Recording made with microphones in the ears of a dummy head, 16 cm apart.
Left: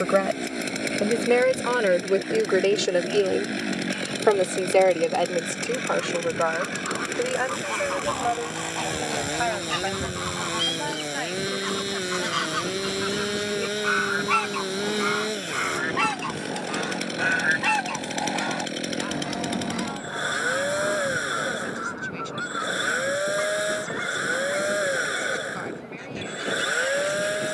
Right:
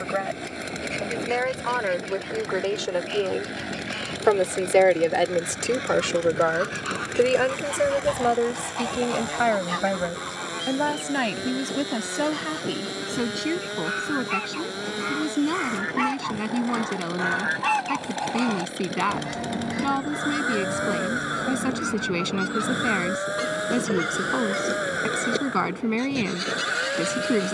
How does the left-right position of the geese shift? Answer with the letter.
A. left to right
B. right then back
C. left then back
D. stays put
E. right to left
C.